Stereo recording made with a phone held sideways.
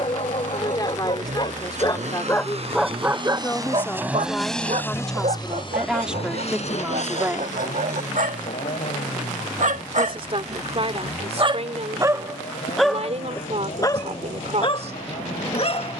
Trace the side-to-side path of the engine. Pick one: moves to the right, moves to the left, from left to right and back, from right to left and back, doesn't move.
moves to the left.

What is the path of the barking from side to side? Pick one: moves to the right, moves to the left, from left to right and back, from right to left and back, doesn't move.
from left to right and back.